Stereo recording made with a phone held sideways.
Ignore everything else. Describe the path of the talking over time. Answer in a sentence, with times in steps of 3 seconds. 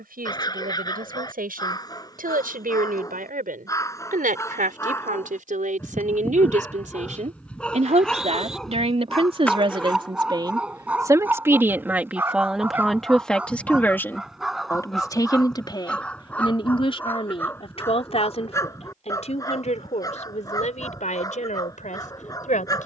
You can hear the talking on the right from 0 s, in the centre from 12 s and on the left from 15 s.